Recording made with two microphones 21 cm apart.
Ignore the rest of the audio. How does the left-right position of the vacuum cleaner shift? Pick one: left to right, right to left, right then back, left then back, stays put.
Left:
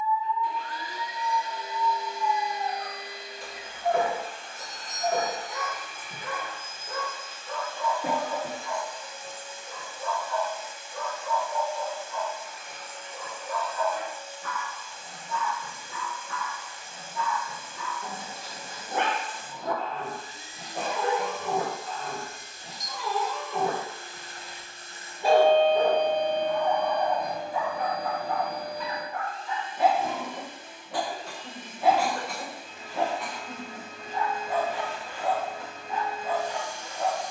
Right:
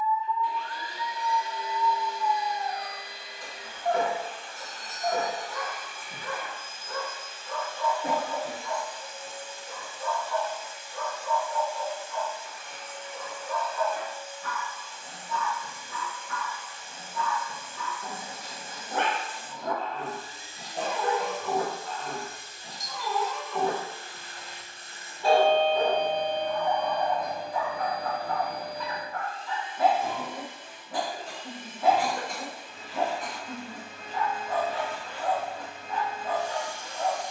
stays put.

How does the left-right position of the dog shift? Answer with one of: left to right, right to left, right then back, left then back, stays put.
stays put.